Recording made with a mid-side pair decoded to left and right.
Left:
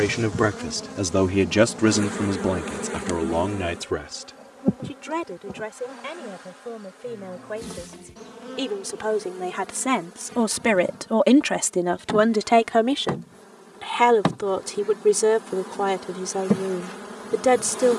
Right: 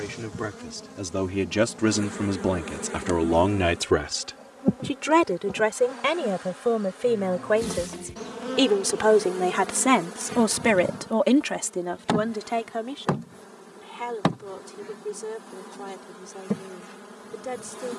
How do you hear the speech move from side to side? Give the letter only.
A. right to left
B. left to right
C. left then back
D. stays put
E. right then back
E.